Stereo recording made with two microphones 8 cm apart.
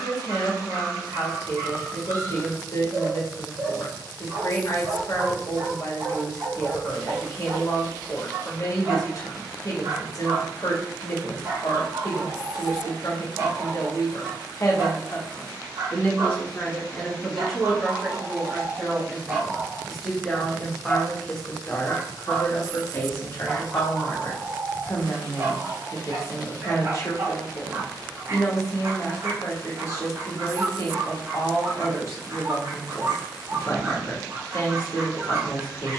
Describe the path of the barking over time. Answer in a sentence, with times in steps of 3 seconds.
You can hear the barking on the right from 0 s, in the centre from 21 s and on the right from 24 s.